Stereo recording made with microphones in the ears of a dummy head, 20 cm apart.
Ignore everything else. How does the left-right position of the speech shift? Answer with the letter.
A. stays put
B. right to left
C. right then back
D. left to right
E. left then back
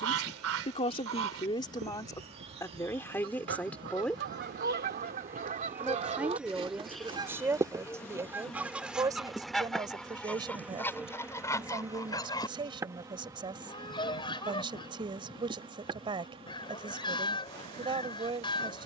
D.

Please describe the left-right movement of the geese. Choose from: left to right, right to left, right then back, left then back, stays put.
right to left.